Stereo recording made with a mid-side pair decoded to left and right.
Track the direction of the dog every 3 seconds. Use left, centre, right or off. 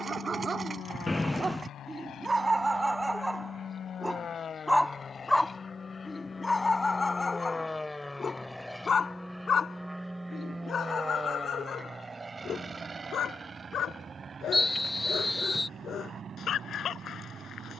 right, centre, left, left, left, left.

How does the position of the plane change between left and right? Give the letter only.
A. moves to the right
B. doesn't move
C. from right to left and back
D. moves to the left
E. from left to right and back
A.